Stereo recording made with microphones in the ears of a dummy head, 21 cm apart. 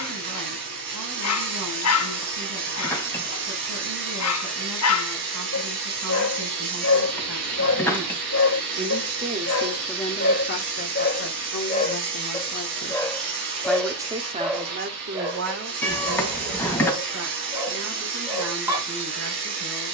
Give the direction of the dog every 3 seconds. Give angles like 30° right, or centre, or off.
70° left, 70° left, 70° left, 50° left, centre, 10° right, 10° right.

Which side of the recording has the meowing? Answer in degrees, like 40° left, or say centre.
10° left.